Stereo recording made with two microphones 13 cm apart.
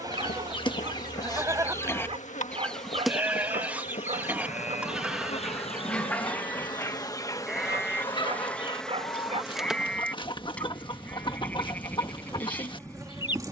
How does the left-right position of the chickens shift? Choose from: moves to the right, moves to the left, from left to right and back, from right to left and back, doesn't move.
from left to right and back.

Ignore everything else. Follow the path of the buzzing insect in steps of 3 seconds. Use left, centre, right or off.
left, left, left, centre, right.